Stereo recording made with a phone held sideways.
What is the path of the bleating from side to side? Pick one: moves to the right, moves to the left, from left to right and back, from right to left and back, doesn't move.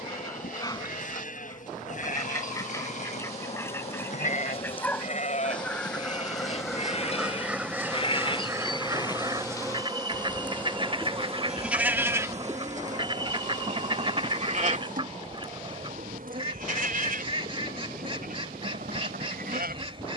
moves to the right.